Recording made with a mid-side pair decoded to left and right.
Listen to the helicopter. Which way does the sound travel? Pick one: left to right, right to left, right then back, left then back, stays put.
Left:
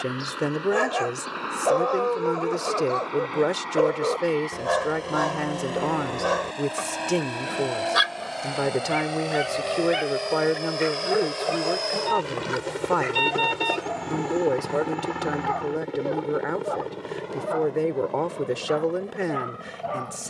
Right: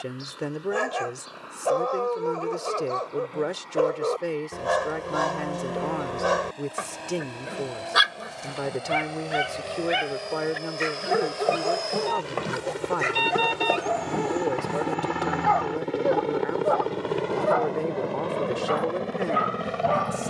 left to right.